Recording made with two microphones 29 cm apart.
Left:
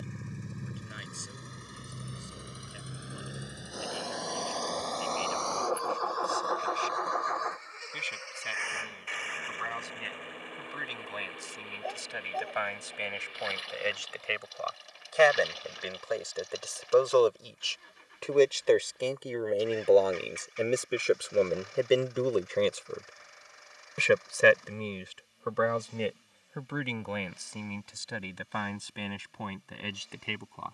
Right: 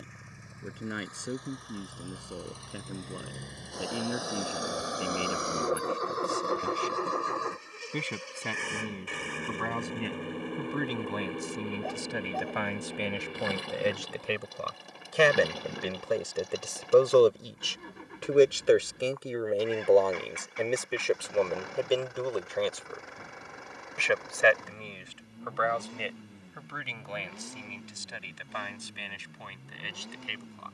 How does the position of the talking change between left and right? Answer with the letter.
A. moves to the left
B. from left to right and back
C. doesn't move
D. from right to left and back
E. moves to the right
A.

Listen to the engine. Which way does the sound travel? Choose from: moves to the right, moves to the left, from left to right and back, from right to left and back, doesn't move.
moves to the right.